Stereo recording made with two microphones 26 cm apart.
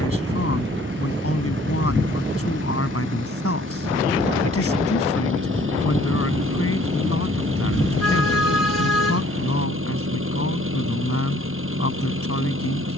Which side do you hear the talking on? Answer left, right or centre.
left.